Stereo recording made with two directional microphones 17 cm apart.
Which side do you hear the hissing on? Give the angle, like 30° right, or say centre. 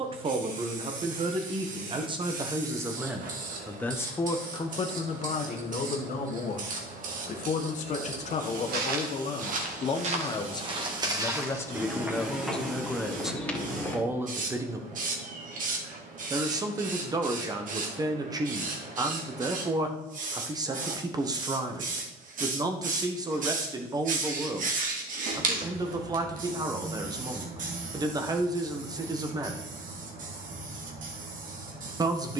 50° right.